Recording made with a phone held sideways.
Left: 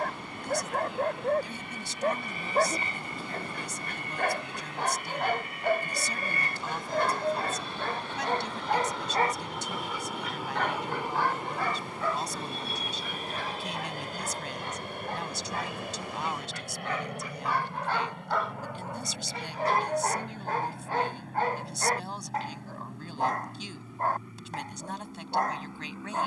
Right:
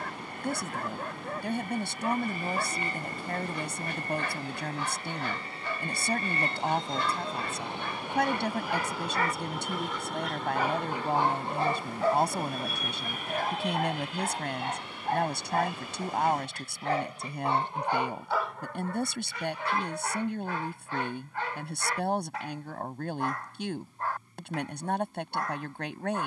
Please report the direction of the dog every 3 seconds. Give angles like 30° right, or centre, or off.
50° left, 50° left, 50° left, 10° right, 50° right, 40° right, 20° left, 40° left, 40° left.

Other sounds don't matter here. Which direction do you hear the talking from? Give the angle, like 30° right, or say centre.
60° right.